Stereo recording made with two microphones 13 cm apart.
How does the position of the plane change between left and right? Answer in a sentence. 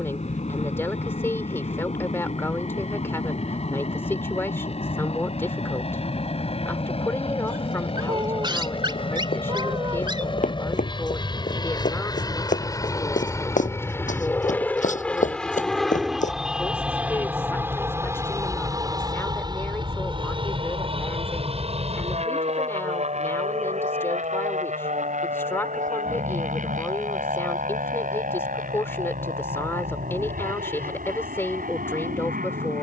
In this clip you hear the plane travel towards the right.